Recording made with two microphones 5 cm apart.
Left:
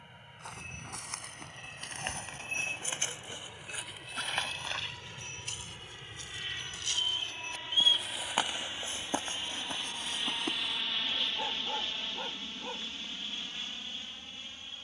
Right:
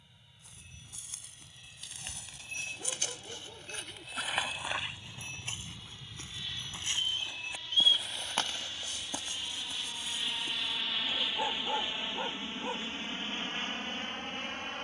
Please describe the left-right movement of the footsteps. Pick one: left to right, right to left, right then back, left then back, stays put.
right then back.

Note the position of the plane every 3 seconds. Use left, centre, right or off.
left, left, left, centre, right.